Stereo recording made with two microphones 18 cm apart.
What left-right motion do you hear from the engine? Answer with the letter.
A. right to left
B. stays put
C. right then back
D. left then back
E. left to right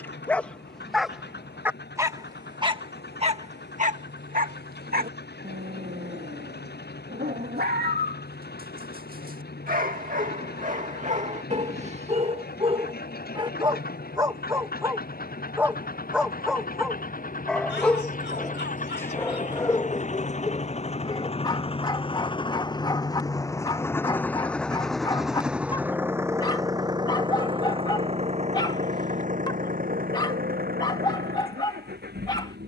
E.